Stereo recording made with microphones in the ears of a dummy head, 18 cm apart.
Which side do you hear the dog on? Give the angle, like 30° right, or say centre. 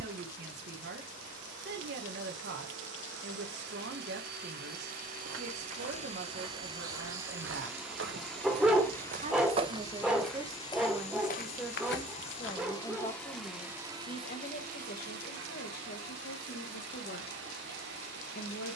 centre.